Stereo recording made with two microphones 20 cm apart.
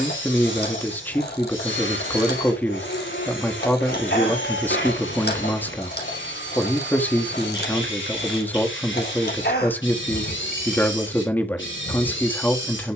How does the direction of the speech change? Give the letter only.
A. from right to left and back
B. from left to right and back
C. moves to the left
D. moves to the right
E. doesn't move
E.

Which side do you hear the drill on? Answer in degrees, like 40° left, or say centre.
80° left.